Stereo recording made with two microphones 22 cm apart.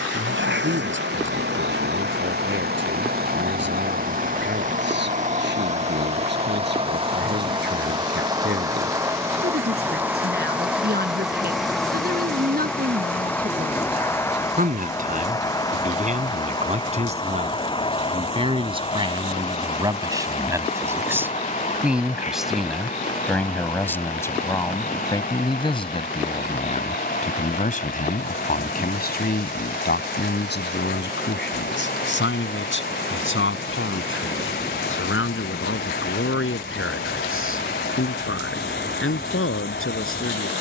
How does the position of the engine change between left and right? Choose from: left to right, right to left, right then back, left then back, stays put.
right to left.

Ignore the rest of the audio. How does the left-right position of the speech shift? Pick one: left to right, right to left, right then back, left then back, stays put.
right to left.